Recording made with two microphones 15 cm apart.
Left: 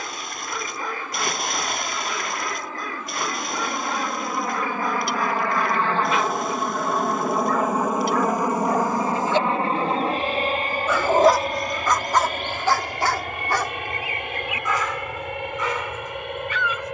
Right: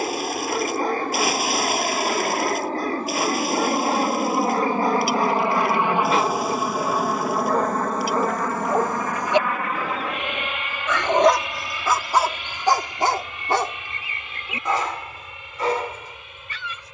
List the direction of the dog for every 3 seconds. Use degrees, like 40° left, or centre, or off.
40° right, 40° right, 40° right, centre, 20° right, 40° right.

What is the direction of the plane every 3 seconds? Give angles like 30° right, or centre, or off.
50° right, 30° right, centre, 40° left, 50° left, 60° left.